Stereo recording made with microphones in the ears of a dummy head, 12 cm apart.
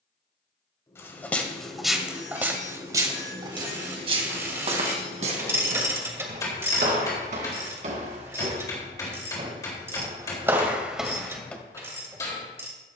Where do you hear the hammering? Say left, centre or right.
left.